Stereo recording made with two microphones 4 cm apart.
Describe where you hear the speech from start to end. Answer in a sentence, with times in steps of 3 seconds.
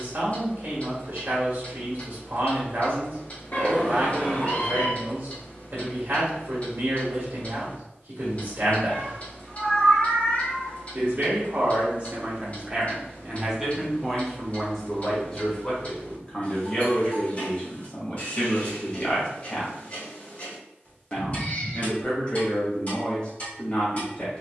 You can hear the speech on the right from 0 s, in the centre from 12 s and on the left from 15 s.